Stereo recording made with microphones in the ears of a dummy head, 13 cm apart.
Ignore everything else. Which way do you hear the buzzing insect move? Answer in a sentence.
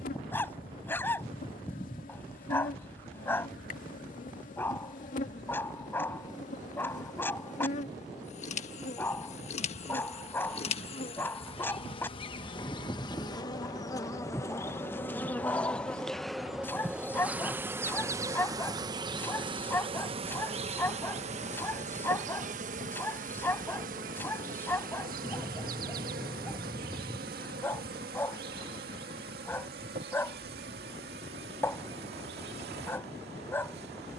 In this clip you hear the buzzing insect move to the right.